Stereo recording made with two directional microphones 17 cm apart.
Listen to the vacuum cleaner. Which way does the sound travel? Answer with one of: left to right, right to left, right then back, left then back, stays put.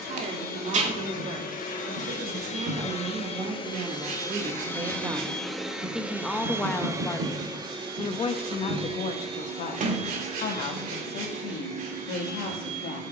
left to right.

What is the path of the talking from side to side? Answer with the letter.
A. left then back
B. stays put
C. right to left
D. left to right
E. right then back
C.